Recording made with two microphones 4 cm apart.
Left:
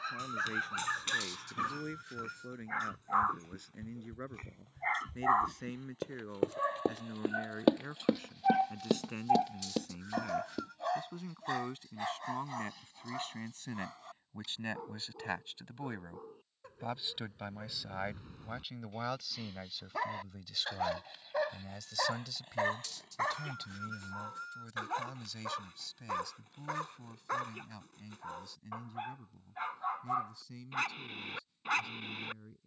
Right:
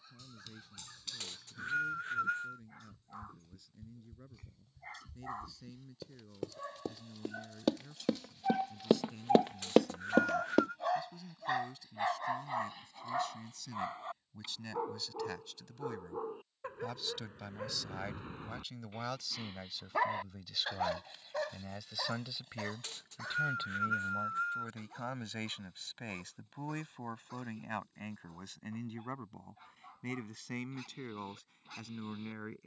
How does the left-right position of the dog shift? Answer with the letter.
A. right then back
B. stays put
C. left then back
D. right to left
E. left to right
A.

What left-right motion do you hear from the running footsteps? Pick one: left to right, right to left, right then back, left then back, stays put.
left to right.